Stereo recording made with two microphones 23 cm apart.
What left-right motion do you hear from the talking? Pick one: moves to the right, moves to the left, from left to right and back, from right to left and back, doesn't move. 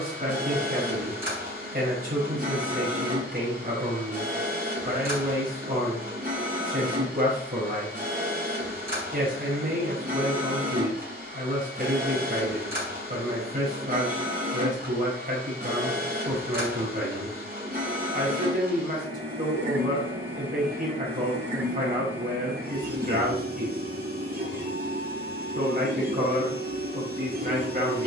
doesn't move.